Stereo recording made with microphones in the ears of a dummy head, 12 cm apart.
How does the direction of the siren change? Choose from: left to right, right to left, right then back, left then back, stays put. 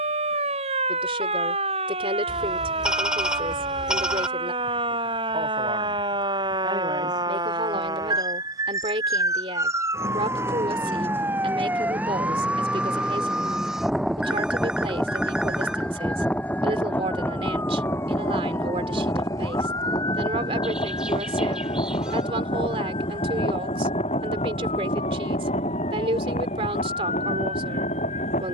right to left.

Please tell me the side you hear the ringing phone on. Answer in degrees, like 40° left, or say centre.
10° right.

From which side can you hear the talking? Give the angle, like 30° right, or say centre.
40° right.